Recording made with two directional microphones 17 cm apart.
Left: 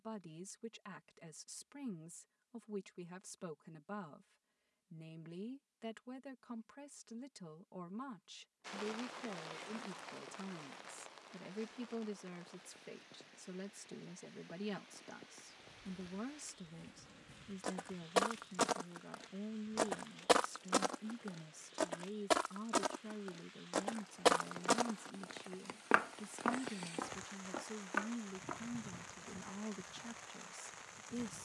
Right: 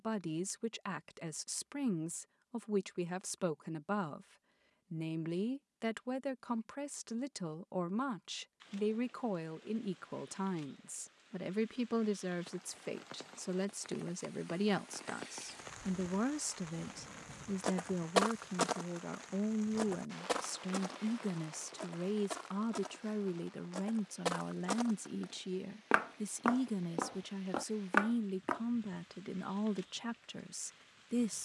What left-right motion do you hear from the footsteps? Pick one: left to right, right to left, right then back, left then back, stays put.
left then back.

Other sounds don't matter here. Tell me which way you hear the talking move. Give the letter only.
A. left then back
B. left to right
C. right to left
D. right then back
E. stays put
E.